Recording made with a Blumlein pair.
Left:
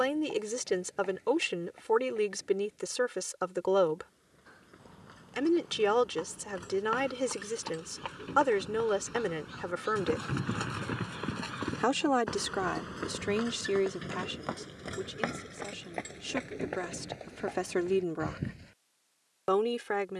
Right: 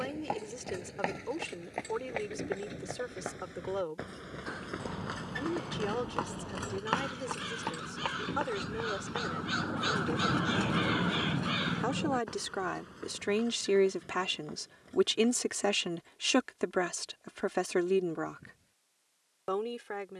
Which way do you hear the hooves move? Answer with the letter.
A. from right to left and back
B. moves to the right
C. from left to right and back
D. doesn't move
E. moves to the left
E.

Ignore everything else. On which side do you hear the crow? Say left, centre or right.
right.